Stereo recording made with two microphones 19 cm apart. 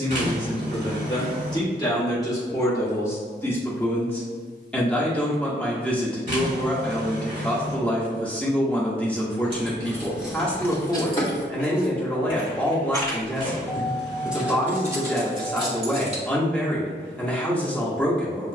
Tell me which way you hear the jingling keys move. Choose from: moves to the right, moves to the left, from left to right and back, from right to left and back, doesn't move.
from right to left and back.